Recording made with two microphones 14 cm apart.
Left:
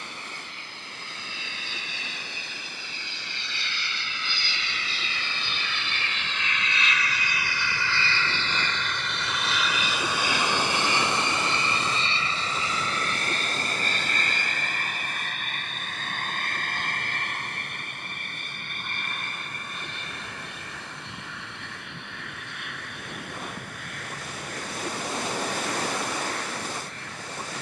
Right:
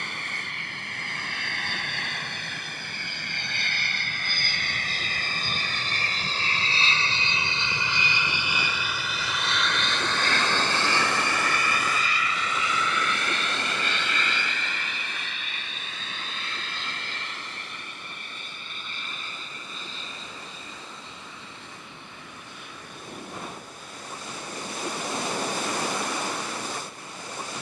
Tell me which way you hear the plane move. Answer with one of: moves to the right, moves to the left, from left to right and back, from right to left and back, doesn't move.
moves to the left.